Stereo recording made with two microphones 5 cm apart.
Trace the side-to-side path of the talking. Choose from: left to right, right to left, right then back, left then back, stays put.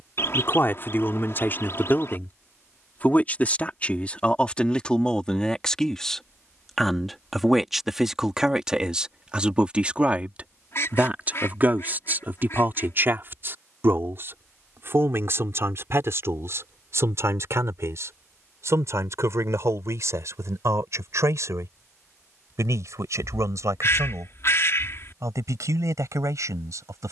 left to right.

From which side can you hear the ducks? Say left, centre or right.
left.